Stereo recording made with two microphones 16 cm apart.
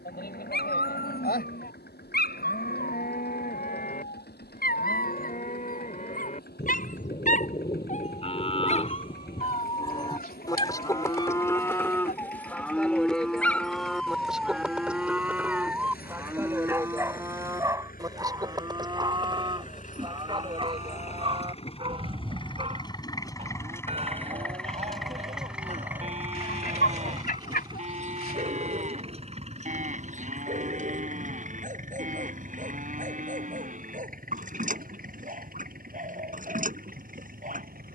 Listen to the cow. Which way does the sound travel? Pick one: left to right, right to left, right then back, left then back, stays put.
left to right.